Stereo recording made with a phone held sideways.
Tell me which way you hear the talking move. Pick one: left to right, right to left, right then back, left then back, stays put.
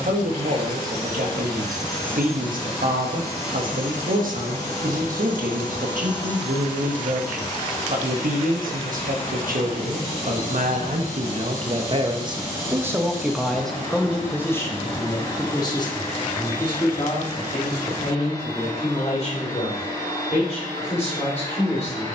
right to left.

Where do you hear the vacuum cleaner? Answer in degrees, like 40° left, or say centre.
20° left.